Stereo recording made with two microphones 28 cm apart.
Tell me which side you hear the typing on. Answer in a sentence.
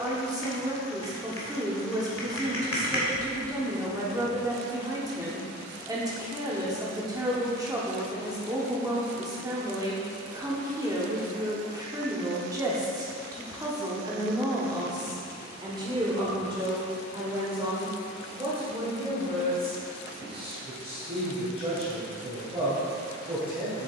You can hear the typing on the left.